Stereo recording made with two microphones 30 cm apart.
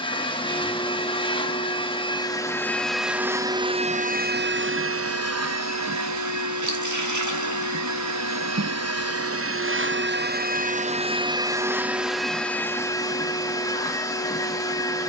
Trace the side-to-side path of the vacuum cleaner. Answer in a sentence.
In this clip you hear the vacuum cleaner go right and come back.